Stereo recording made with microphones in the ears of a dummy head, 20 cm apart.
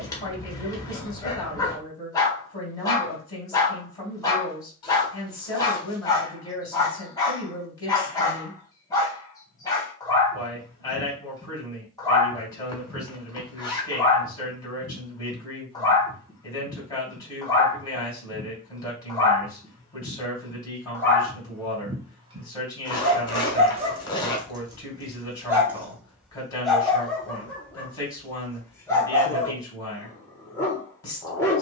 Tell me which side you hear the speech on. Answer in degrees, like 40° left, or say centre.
20° left.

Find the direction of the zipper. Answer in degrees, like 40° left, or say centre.
20° left.